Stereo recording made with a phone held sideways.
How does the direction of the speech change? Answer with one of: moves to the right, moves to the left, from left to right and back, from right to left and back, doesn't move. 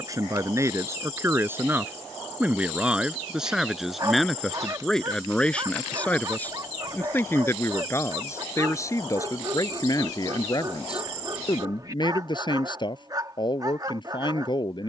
moves to the left.